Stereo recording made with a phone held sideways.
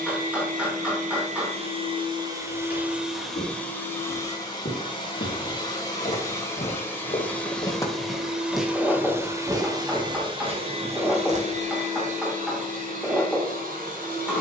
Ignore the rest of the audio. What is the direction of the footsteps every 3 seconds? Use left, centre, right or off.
left, left, left, right, off.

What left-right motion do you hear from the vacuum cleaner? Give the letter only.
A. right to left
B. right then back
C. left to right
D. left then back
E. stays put
D.